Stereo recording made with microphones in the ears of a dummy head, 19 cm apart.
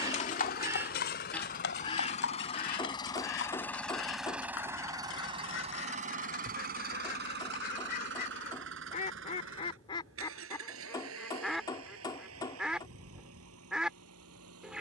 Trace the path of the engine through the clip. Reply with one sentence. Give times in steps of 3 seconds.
In this clip you hear the engine on the left from 0 s, in the centre from 3 s and on the right from 6 s.